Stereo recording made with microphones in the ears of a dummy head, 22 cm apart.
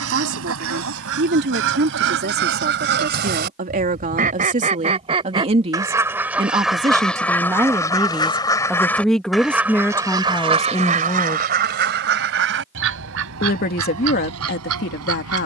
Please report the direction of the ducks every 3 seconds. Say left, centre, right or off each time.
right, right, centre, right, right.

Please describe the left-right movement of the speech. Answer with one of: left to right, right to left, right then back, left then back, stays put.
right to left.